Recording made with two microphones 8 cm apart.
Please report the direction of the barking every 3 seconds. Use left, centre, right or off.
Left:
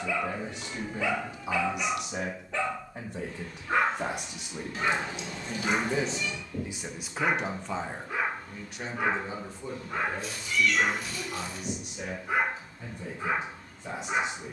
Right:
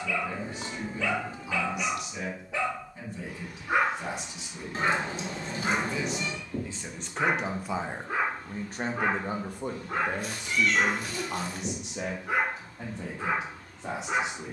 centre, right, right, right, right.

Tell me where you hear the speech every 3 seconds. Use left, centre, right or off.
left, left, centre, right, right.